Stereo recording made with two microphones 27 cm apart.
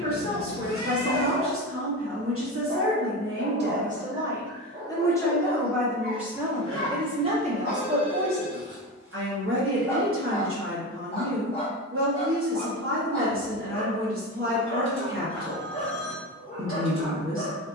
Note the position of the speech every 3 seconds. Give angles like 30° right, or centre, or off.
50° right, 20° right, 20° right, 50° right, 50° right, 50° right.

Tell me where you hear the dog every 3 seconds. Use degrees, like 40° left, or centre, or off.
50° right, 50° right, 40° right, 10° left, 20° left, 20° left.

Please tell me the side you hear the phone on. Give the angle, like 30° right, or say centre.
centre.